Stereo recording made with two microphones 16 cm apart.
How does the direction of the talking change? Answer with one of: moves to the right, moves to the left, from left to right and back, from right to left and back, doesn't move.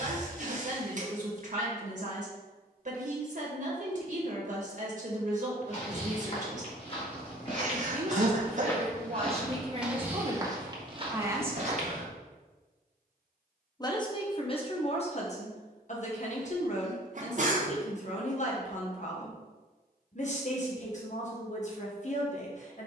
moves to the left.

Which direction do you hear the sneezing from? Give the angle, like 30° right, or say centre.
50° right.